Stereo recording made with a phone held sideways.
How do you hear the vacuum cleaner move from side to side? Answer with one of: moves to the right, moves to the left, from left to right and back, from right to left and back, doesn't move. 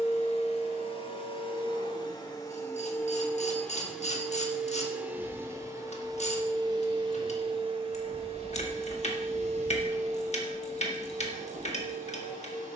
moves to the right.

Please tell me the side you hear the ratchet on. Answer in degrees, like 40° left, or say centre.
50° left.